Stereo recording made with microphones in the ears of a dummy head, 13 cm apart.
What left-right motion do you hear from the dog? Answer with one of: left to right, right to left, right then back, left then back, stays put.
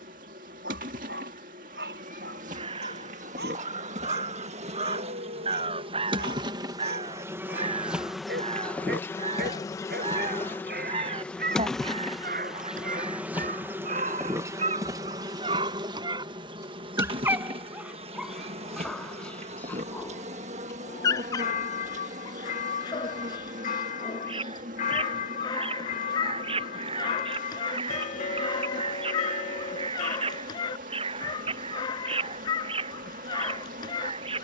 right to left.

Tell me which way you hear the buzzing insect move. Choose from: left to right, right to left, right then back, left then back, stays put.
left then back.